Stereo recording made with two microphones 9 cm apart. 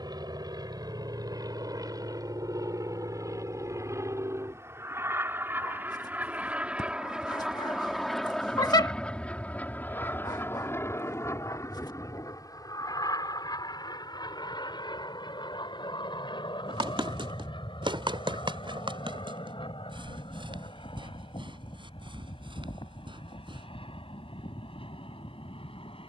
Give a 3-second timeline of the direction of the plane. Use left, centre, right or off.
right, right, centre, left, left, left, left, left, left.